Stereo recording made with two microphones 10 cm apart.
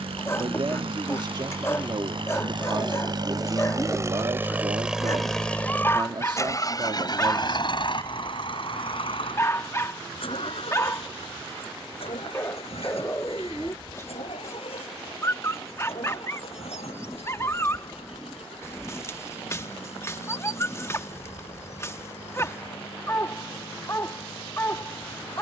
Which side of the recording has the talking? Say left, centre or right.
right.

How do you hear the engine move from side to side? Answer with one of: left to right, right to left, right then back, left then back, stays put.
right to left.